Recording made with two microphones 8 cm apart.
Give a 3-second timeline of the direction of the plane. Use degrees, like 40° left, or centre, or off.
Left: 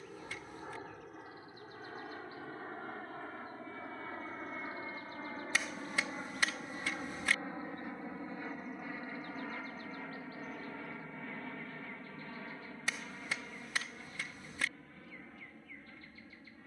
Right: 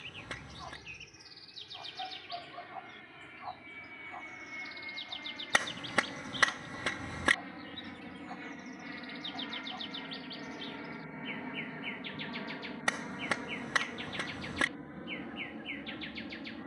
50° left, 40° left, 20° left, centre, 30° right, 40° right.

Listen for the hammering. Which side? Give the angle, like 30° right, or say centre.
60° right.